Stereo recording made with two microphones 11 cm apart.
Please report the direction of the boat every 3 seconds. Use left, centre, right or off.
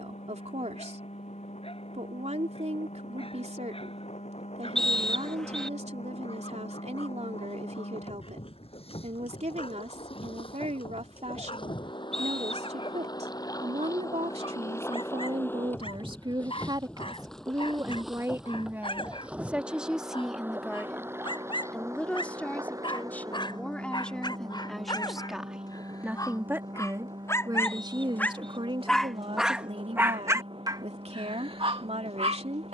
left, left, left, left, left, centre, centre, right, right, right, right.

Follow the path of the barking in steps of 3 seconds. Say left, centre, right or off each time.
left, left, left, left, left, left, left, left, left, centre, right.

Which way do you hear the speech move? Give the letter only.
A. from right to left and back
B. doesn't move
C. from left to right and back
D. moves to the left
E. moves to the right
A.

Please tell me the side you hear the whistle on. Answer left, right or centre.
centre.